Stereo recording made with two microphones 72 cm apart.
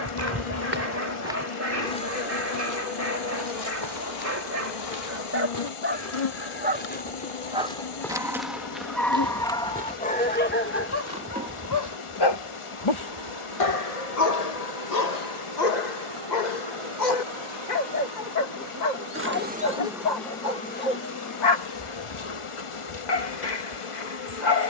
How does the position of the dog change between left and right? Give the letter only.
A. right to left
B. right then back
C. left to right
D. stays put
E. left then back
A.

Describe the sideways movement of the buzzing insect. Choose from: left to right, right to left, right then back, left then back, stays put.
right then back.